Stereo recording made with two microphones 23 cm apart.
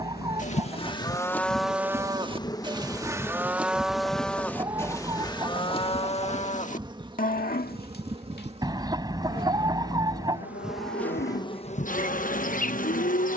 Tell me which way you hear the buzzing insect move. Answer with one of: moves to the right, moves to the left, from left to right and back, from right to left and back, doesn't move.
from left to right and back.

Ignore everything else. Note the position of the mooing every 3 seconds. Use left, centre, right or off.
centre, centre, left, left, left.